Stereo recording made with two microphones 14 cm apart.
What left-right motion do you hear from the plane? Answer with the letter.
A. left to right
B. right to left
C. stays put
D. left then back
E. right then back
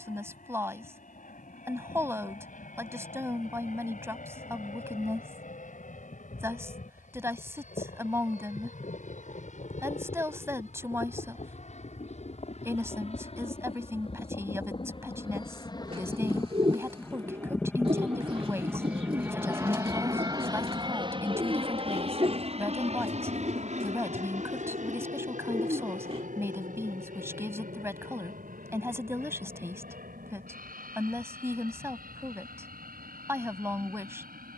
A.